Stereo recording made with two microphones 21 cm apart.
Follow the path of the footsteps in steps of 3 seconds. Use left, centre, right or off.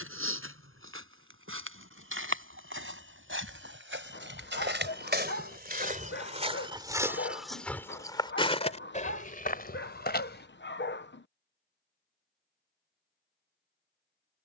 right, right, centre, left, off.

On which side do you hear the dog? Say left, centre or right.
left.